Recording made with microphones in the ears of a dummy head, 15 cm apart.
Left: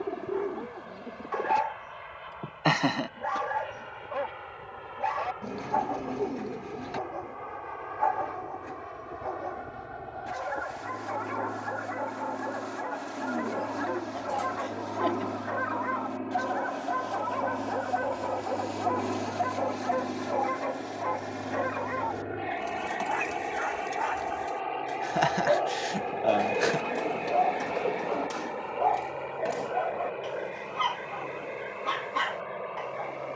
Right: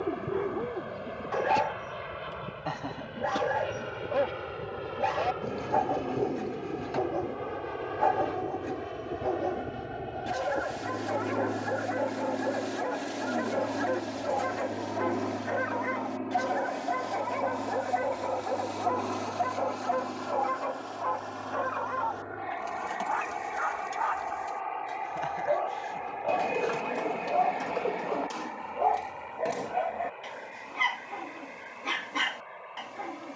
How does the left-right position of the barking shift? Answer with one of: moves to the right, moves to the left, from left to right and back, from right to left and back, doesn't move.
from right to left and back.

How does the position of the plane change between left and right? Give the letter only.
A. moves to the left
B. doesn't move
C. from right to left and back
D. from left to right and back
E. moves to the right
A.